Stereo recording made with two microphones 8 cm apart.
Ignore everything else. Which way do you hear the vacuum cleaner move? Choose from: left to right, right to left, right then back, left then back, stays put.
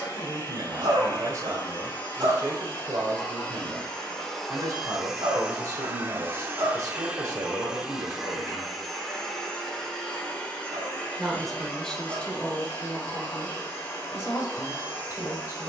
right then back.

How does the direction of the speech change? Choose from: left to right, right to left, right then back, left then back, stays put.
right to left.